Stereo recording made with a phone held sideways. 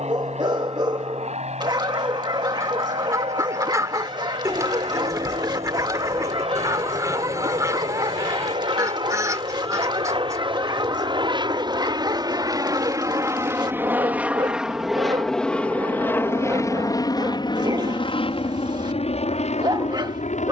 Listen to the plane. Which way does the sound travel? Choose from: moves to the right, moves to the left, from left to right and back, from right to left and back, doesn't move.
moves to the left.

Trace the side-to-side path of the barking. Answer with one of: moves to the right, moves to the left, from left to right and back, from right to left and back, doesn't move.
doesn't move.